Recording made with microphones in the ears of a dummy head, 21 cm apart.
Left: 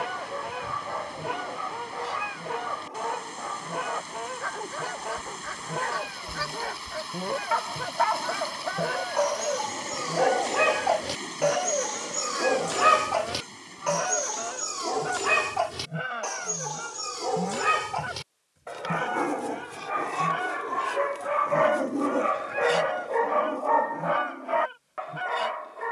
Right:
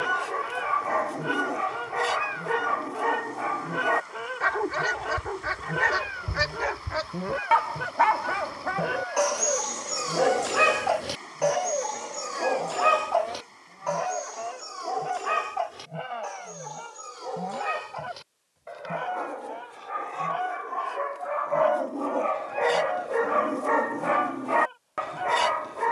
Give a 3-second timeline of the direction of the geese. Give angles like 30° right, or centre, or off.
20° right, 20° right, 10° right, centre, 10° left, 20° left, 30° left, 30° left, 30° left.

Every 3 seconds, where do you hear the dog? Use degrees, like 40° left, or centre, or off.
70° right, 70° right, 50° right, 10° right, 30° left, 60° left, 60° left, 10° left, 50° right.